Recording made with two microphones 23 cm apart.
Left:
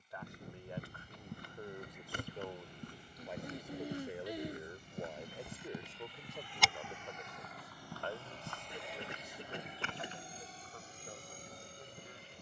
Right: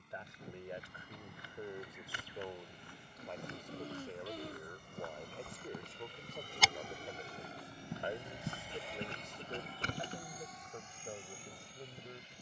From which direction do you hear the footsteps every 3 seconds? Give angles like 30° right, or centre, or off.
50° left, 30° left, 20° right, 40° right.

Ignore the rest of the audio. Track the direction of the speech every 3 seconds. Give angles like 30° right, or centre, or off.
10° right, 10° left, 10° right, 30° right.